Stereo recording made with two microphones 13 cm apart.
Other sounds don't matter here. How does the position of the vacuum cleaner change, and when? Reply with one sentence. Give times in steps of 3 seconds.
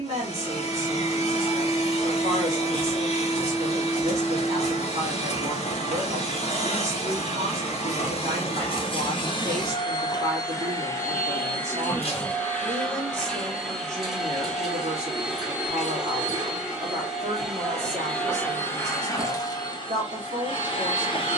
You can hear the vacuum cleaner on the left from 0 s, in the centre from 12 s and on the left from 18 s.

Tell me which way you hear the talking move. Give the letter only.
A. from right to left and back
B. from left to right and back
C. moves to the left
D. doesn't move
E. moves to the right
D.